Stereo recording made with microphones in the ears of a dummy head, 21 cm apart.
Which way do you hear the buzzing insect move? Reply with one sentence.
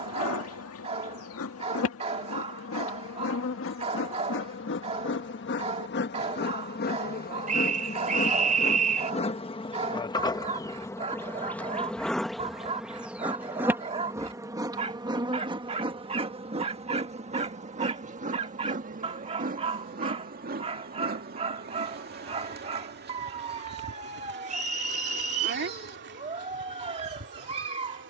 You can hear the buzzing insect move to the right.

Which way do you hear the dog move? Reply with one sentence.
In this clip you hear the dog stay in one place.